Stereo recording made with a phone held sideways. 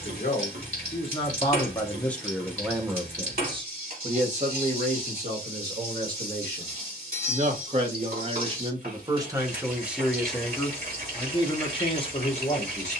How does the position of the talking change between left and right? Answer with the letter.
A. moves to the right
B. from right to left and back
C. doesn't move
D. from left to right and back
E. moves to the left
D.